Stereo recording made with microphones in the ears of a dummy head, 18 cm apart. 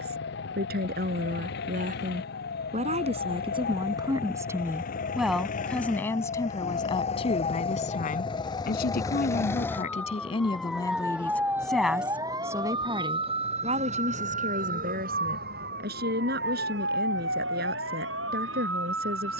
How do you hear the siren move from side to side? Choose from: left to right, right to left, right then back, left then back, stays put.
left to right.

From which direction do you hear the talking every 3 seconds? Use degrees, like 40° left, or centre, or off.
40° right, 10° right, 30° left, 20° left, 30° right, 50° right, 50° right.